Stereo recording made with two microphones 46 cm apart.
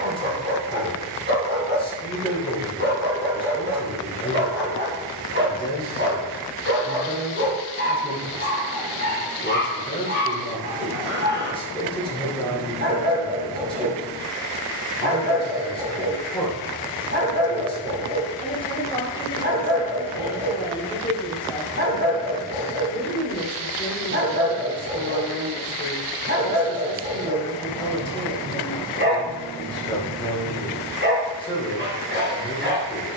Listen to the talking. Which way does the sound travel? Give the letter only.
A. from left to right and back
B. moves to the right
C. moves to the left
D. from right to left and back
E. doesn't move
E.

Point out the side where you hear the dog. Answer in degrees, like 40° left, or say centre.
20° right.